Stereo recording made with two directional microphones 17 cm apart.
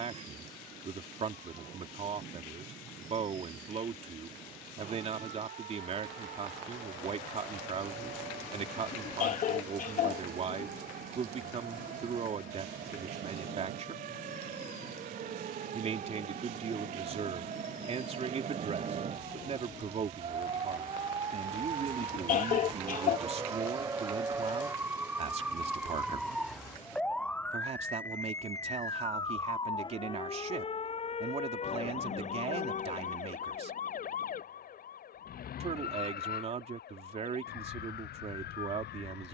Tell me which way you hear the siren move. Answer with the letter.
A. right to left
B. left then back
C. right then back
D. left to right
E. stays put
A.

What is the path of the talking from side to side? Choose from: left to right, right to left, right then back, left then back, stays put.
stays put.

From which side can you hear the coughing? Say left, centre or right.
left.